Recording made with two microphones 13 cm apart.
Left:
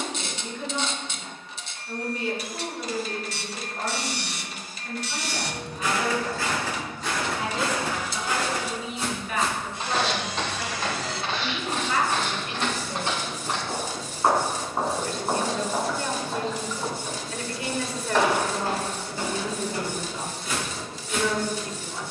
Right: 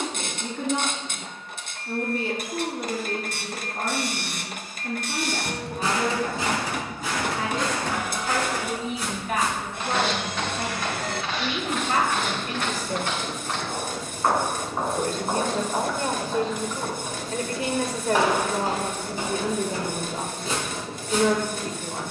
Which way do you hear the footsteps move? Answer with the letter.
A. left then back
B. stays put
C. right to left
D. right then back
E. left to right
A.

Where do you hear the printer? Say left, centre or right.
right.